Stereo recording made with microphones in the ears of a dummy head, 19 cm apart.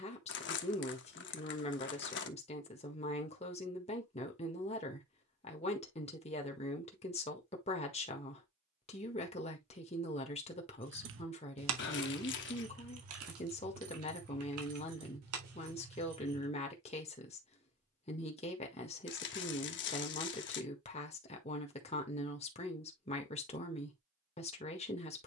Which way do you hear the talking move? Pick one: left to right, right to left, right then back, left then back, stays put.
stays put.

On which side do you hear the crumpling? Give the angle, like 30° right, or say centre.
60° left.